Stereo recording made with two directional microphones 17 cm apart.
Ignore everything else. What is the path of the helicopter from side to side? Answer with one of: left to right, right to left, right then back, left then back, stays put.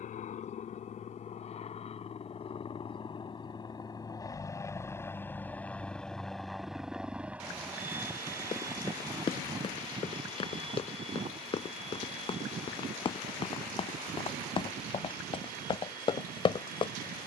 left to right.